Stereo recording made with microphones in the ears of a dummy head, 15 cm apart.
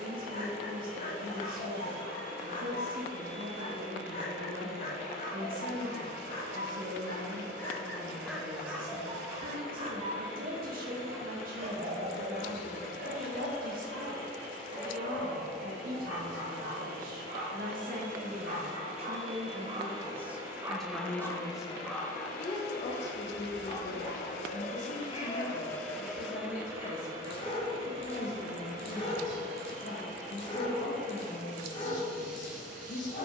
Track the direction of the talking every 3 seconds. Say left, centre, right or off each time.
right, right, right, right, right, right, right, left, left, left, left.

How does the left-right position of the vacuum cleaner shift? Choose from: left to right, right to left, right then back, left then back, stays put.
left then back.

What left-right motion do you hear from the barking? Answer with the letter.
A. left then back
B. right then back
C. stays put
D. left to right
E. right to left
B.